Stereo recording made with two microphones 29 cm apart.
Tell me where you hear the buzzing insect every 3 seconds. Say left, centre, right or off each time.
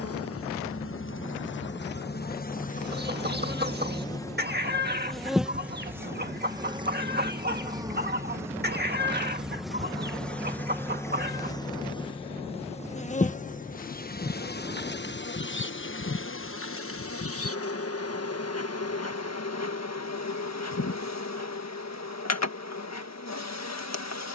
left, centre, centre, centre, left, left, left, left.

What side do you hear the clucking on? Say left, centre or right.
right.